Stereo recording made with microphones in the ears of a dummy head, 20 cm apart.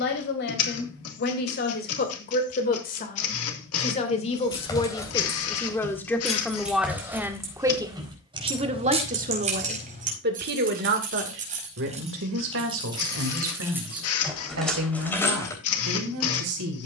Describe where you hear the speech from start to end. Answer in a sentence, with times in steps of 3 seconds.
In this clip you hear the speech on the left from 0 s, in the centre from 6 s and on the right from 9 s.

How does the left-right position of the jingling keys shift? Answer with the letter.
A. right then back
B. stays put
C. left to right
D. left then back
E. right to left
A.